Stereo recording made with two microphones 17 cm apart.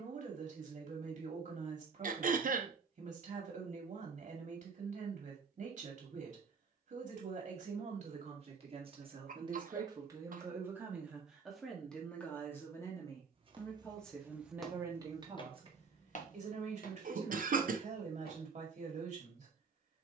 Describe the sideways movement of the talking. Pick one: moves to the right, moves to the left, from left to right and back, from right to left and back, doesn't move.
from right to left and back.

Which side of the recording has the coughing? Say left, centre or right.
right.